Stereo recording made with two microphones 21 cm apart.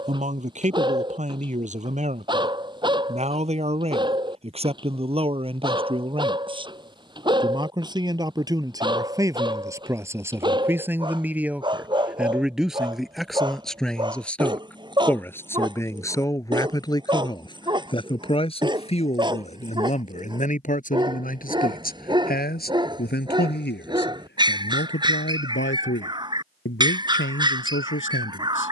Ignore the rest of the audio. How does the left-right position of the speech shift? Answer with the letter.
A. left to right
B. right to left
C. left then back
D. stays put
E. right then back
B.